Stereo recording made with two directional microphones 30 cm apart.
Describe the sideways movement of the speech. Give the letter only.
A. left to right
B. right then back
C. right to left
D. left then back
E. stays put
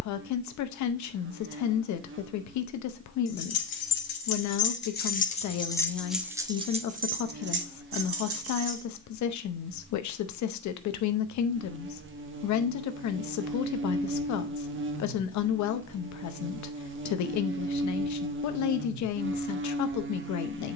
E.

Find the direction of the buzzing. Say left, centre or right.
right.